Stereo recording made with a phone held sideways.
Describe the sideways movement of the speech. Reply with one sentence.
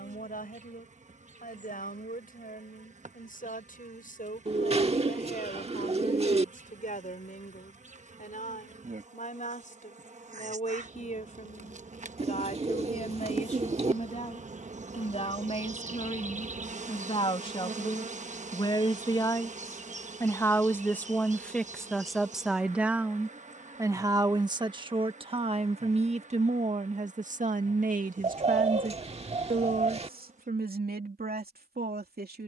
You can hear the speech move to the right.